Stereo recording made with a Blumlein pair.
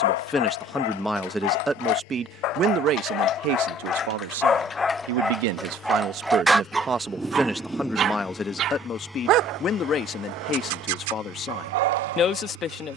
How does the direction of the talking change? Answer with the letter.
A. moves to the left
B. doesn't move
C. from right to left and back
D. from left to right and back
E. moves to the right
D.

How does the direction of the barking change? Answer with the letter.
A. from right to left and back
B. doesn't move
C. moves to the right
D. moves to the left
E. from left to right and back
C.